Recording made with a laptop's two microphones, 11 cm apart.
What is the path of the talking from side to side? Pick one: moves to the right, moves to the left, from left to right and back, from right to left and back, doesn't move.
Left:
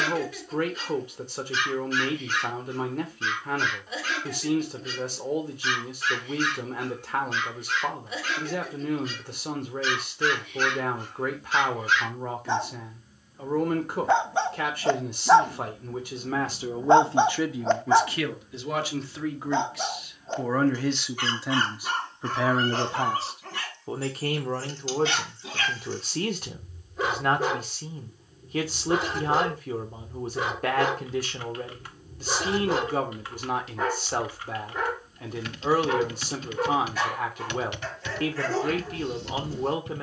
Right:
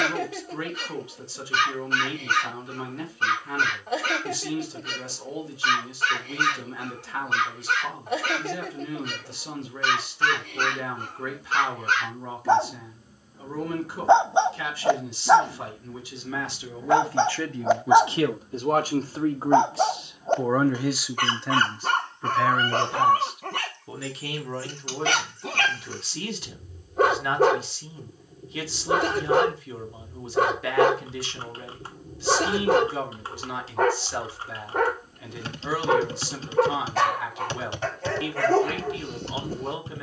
from left to right and back.